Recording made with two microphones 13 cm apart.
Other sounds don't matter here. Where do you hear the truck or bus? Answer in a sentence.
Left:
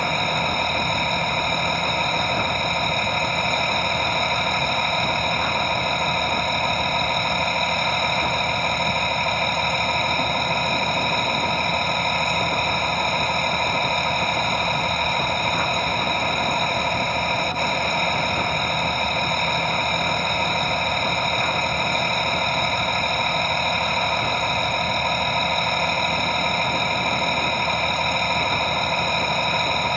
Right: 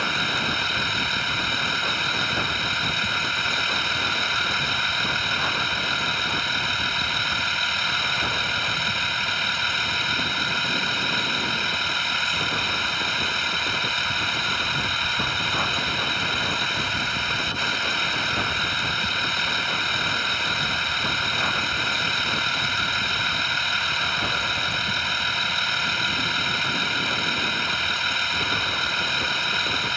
You can hear the truck or bus on the left.